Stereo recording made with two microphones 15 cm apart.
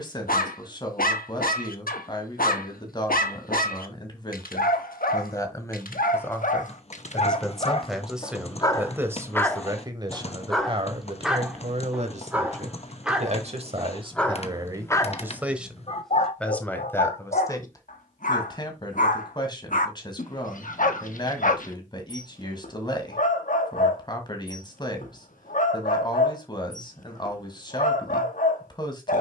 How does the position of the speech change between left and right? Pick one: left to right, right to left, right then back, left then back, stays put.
right then back.